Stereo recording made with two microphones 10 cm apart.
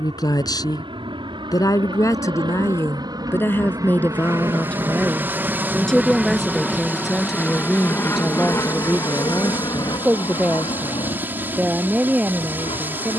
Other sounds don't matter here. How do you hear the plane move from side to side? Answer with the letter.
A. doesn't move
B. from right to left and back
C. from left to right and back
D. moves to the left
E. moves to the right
D.